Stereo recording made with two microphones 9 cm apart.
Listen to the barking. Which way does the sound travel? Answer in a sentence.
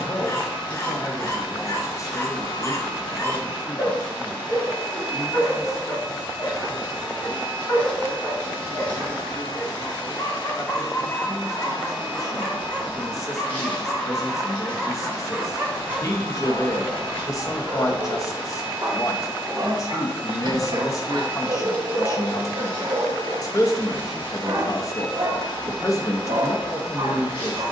You can hear the barking go from the left side to the right.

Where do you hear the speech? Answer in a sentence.
In this clip you hear the speech on the left.